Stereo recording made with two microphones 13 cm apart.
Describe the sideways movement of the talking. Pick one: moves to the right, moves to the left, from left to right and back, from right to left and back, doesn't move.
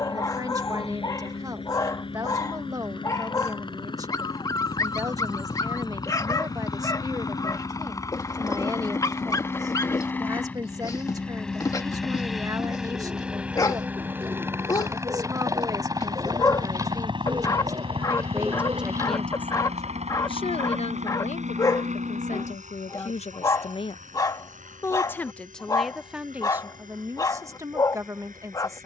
from right to left and back.